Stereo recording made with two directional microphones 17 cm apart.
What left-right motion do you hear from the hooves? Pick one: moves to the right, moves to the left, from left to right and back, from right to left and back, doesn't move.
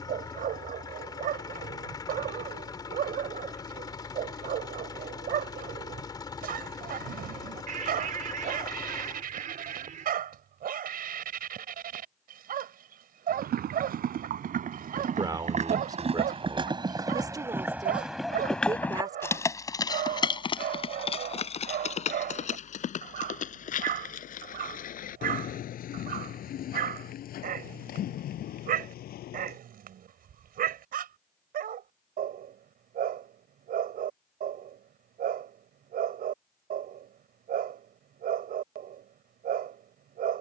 moves to the left.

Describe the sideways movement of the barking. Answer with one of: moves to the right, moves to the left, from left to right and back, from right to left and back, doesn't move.
doesn't move.